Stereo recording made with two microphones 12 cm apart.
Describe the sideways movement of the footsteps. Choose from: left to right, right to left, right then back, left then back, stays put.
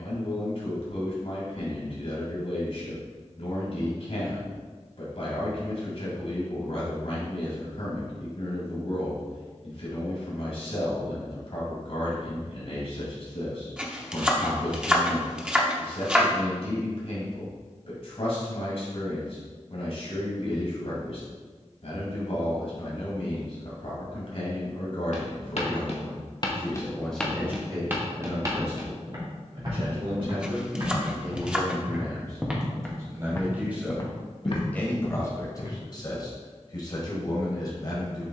right then back.